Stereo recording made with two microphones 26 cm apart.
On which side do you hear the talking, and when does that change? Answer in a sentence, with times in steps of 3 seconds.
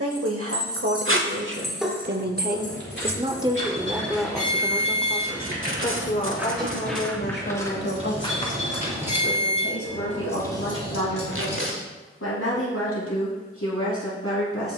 In this clip you hear the talking on the right from 0 s, in the centre from 3 s and on the left from 6 s.